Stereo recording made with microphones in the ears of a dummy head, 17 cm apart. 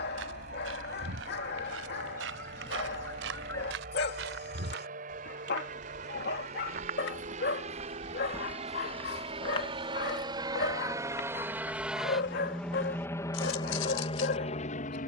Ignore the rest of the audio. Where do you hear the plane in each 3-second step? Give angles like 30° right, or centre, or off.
50° right, 50° right, 40° right, 20° right, 20° left.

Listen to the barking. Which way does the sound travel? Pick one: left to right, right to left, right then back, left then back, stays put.
stays put.